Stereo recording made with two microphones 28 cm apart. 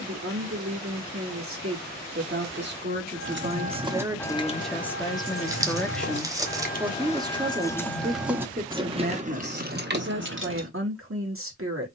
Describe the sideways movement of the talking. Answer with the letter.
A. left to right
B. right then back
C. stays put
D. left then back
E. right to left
D.